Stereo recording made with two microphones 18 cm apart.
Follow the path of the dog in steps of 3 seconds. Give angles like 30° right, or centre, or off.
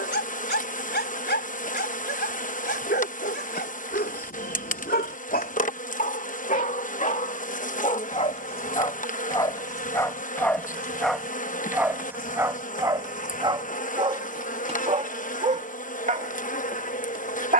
70° left, 60° left, 40° left, 10° left, 20° right, 50° right.